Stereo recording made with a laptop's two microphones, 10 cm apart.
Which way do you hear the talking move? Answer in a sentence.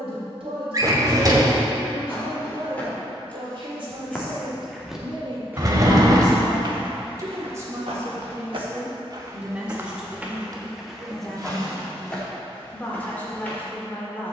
You can hear the talking go from the right side to the left.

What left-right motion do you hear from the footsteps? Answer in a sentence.
You can hear the footsteps go right and come back.